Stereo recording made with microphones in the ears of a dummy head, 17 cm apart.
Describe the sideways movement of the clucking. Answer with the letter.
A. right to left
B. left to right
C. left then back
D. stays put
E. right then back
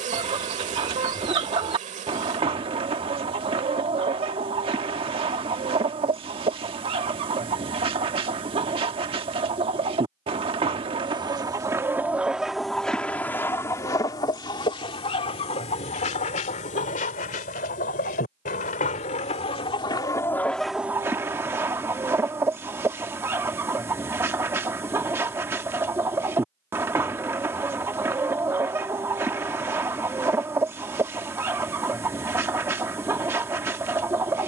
C.